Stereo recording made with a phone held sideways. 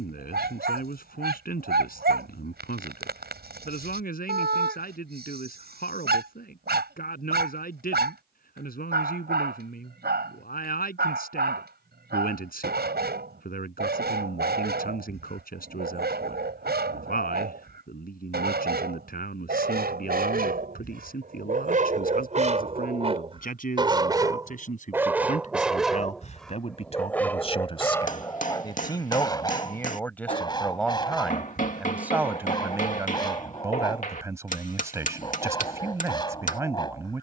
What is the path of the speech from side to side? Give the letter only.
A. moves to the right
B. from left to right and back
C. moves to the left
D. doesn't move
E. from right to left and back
A.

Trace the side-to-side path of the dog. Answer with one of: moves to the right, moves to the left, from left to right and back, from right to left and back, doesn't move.
moves to the left.